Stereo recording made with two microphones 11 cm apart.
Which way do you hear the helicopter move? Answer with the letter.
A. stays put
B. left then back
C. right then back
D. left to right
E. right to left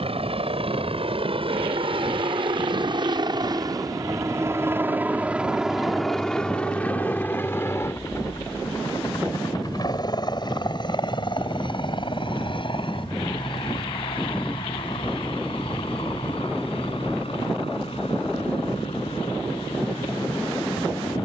E.